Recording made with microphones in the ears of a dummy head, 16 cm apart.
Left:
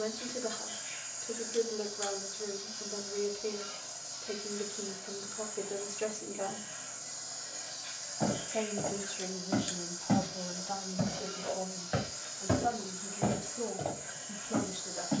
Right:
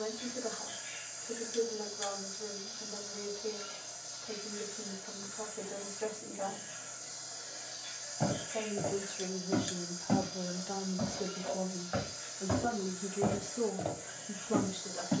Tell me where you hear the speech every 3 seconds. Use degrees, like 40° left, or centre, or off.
30° left, 30° left, 20° left, 20° right, 60° right.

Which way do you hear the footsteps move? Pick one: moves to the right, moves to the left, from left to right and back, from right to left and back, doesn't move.
from right to left and back.